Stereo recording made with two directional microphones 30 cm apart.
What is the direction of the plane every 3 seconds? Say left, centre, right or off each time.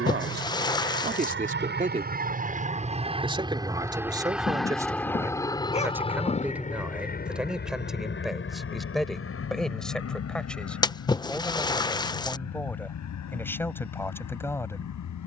right, centre, left, left, left.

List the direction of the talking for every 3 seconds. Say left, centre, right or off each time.
right, centre, centre, centre, centre.